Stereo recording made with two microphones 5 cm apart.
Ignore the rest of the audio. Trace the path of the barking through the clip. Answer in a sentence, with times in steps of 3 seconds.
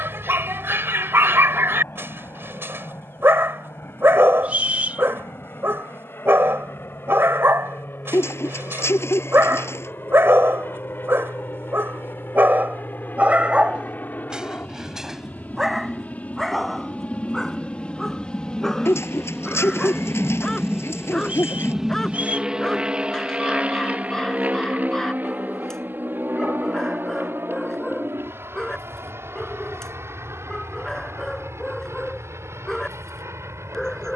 In this clip you hear the barking on the right from 0 s and in the centre from 15 s.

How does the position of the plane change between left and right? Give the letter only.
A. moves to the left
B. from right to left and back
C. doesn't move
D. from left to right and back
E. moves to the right
E.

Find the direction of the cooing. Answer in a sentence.
In this clip you hear the cooing on the left.